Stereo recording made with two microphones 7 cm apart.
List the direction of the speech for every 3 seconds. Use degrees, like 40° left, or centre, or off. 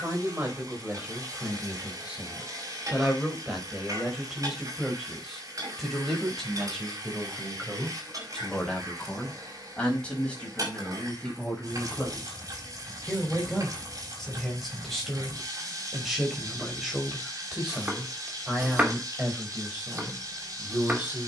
20° right, centre, 10° left, 10° left, 10° left, centre, 20° right.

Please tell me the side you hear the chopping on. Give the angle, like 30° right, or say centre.
20° right.